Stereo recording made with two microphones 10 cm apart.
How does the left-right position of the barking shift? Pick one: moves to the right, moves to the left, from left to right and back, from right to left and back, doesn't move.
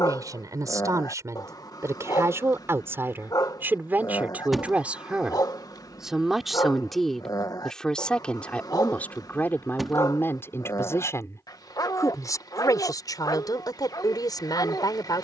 doesn't move.